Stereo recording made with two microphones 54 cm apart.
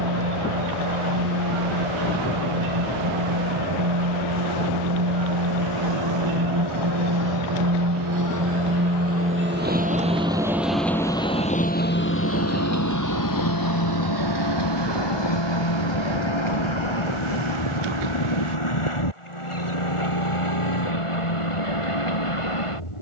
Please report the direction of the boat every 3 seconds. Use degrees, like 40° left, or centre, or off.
70° right, 60° right, 40° right, centre, 40° left, 60° left, 70° left, 70° left.